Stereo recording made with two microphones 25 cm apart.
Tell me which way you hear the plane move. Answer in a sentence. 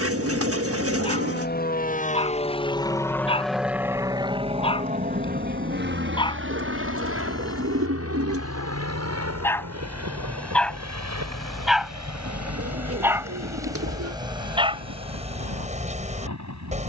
You can hear the plane go from the left side to the right.